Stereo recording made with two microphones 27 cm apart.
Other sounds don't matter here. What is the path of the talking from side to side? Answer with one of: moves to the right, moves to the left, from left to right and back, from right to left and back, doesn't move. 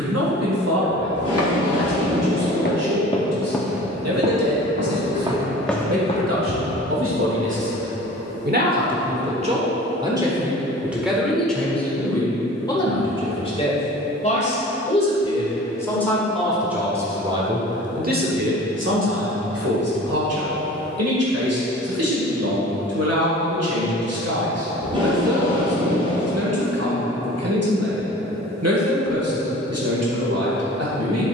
from right to left and back.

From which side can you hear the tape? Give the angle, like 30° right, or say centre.
20° right.